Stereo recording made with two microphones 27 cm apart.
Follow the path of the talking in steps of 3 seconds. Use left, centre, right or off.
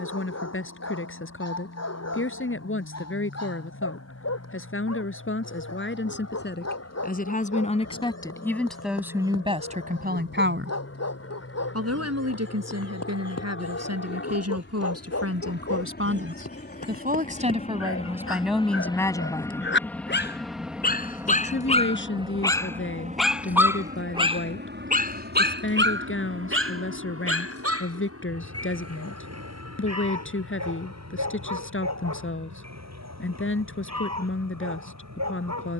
left, left, left, right, right, right, centre, left, left, left, left, left.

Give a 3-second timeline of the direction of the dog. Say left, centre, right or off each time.
left, left, left, left, left, left, left, centre, right, right, right, right.